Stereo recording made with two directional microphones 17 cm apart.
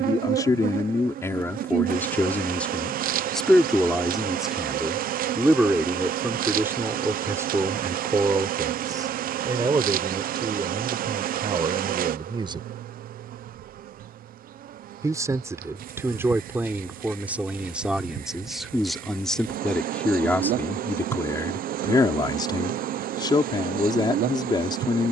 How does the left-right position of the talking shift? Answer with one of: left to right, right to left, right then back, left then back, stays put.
right then back.